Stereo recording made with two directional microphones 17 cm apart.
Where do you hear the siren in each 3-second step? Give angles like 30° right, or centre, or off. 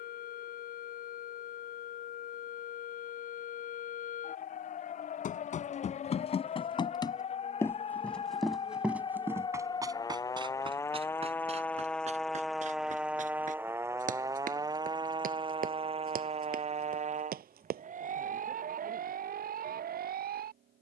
60° left, 50° left, 40° left, 20° left, 10° right, 40° right, 60° right.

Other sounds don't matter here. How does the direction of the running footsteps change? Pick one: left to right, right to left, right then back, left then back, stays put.
left to right.